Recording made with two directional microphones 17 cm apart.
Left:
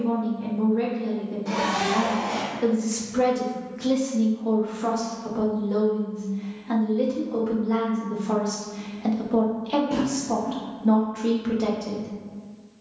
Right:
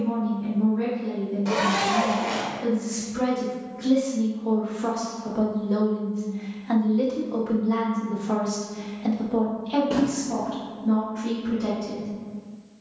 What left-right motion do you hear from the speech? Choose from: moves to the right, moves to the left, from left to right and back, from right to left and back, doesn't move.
from left to right and back.